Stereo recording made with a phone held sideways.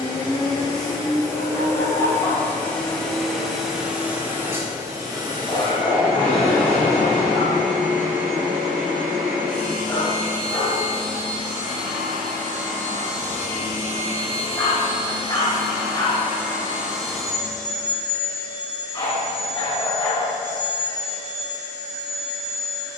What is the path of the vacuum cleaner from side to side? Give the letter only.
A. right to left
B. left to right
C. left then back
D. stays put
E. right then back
E.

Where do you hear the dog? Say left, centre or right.
left.